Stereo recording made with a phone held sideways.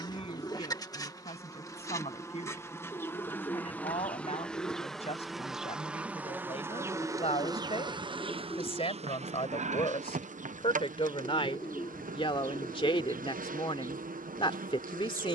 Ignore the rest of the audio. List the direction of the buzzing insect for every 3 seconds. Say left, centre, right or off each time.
left, centre, right, right, right.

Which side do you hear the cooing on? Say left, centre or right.
left.